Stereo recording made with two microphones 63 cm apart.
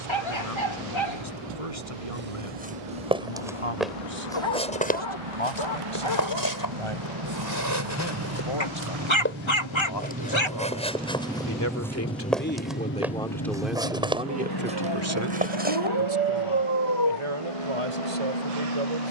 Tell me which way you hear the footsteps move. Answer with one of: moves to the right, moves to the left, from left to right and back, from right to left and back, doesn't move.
from right to left and back.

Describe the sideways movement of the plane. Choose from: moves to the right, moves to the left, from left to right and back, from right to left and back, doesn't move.
moves to the left.